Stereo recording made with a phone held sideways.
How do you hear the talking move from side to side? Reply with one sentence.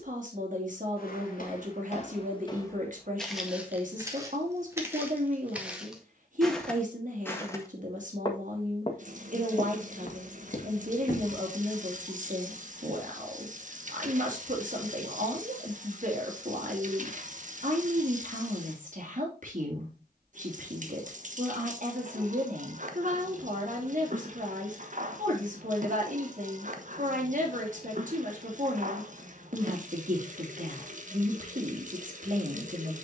You can hear the talking stay put.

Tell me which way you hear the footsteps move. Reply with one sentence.
In this clip you hear the footsteps move from left to right and back again.